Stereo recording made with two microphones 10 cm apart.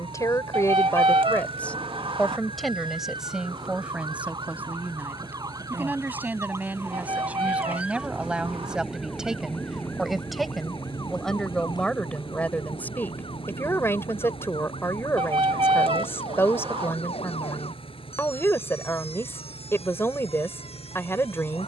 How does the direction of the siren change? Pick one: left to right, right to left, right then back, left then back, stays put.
right to left.